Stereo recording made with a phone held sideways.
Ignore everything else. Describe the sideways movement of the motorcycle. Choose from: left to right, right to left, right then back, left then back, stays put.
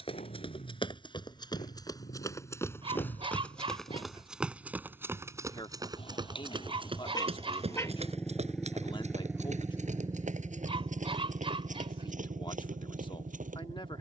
left to right.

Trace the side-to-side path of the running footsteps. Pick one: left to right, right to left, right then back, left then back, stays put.
left to right.